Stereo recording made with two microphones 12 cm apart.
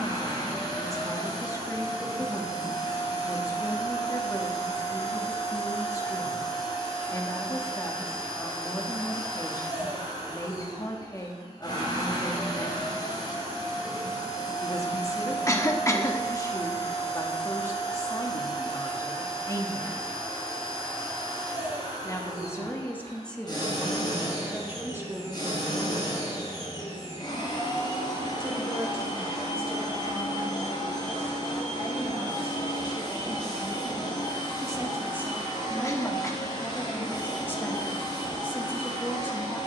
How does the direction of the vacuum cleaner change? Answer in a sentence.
In this clip you hear the vacuum cleaner stay in one place.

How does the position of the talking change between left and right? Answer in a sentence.
You can hear the talking move from left to right and back again.